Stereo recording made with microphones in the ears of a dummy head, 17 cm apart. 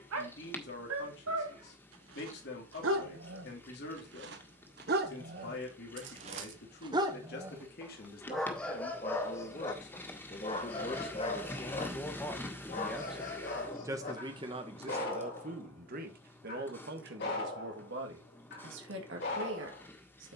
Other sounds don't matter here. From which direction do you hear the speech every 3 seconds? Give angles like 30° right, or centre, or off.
60° left, 60° left, 50° left, 30° left, 10° right, 50° right, 70° right.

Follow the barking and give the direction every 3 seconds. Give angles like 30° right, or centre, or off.
80° right, 60° right, 10° right, 20° left, 40° left, 50° left, 60° left.